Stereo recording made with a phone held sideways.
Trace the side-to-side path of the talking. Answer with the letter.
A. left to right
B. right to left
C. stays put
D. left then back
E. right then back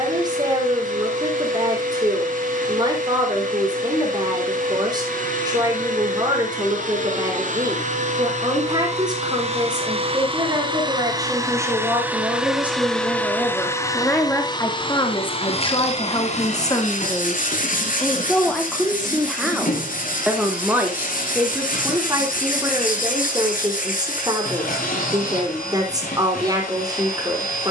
D.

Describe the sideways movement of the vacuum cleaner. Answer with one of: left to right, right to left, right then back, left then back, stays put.
right to left.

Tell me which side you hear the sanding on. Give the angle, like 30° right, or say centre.
70° left.